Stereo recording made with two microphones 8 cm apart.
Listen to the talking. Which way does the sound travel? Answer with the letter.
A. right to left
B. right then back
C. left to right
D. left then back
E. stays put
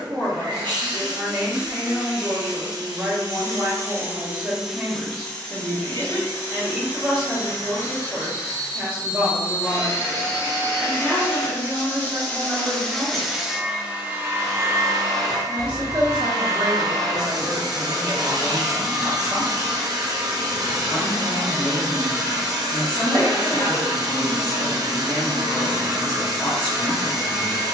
A.